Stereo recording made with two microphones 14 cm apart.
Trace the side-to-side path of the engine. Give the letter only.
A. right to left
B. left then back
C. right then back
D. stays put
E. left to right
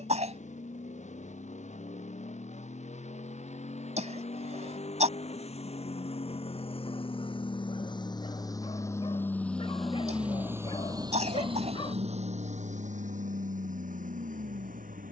E.